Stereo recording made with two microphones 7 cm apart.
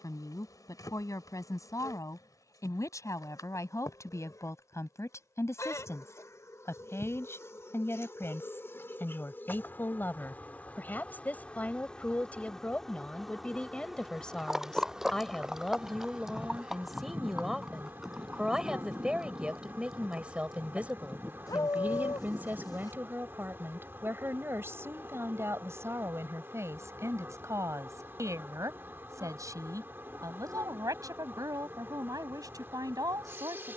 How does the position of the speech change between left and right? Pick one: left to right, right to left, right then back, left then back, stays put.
left to right.